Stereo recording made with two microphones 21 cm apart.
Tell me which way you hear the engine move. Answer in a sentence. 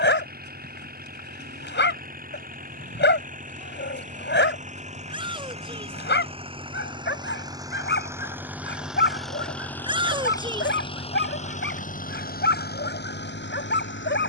In this clip you hear the engine move to the left.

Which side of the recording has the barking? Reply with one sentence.
In this clip you hear the barking on the left.